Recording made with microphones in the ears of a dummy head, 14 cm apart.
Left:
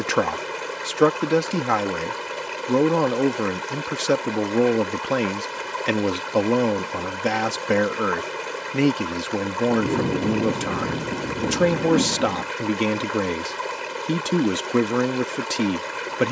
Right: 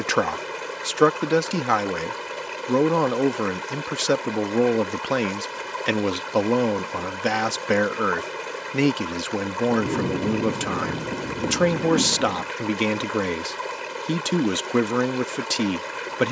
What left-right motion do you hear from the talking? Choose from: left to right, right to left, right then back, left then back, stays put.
stays put.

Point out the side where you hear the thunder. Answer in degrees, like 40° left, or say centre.
70° left.